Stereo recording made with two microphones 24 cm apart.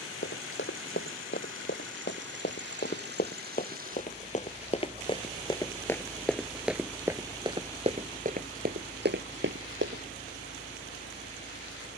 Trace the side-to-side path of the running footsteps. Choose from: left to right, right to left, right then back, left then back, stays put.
left to right.